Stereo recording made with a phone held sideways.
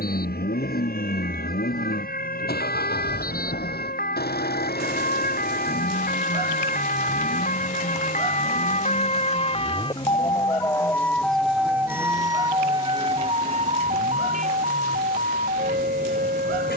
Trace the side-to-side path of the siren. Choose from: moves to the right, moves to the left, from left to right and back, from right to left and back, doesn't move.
moves to the right.